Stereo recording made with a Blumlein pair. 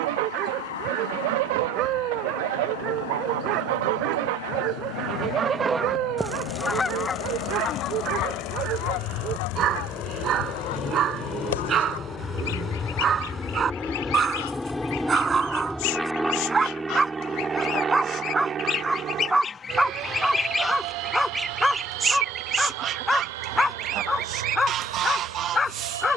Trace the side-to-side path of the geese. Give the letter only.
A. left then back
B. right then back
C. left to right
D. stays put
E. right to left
A.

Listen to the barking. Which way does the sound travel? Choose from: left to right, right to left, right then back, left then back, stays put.
right to left.